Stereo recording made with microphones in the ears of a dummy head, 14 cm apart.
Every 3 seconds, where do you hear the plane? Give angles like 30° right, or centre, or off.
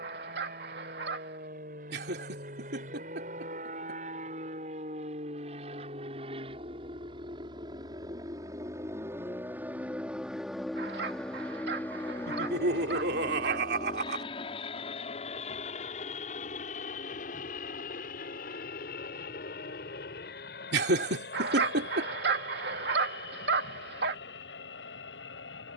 60° right, 50° right, 30° right, centre, 20° left, 40° left, 60° left, 60° left, 70° left.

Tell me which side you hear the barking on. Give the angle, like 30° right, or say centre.
80° right.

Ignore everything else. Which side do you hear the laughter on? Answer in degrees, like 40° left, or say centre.
80° right.